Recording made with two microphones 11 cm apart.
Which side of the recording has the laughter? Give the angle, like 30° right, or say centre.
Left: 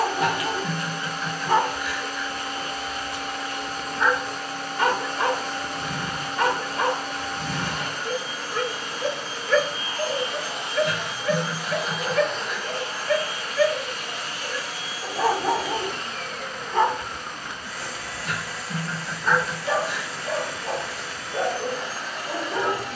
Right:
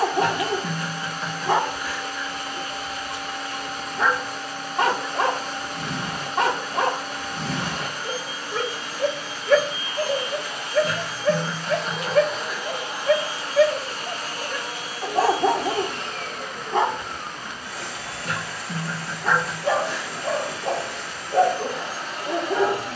40° right.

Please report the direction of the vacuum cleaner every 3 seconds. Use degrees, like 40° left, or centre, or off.
40° left, 40° left, 40° left, 20° left, 30° right, 60° right, 60° right, 60° right.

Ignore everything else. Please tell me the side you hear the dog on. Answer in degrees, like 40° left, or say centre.
60° right.